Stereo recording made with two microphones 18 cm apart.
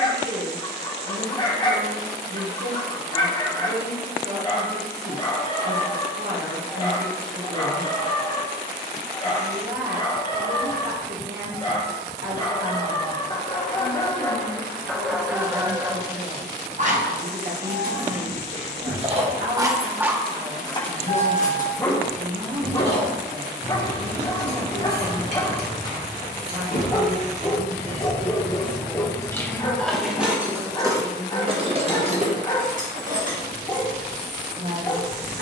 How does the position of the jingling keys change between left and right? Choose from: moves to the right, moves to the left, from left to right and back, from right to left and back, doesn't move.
from right to left and back.